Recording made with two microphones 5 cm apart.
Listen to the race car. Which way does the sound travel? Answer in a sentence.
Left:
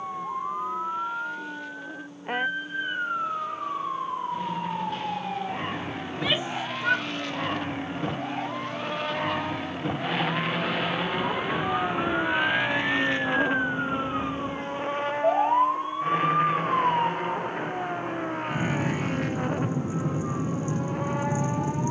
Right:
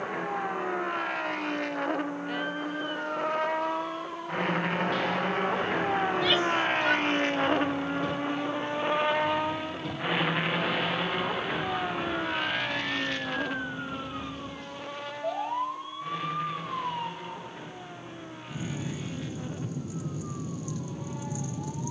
In this clip you hear the race car move from right to left.